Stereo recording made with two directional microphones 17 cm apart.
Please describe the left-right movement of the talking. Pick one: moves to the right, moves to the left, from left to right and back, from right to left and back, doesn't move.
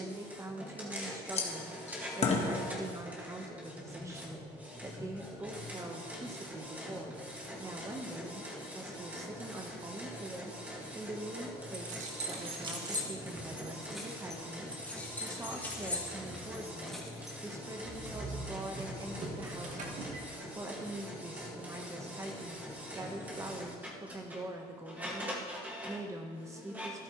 doesn't move.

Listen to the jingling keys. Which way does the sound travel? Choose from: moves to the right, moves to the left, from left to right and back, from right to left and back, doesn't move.
from right to left and back.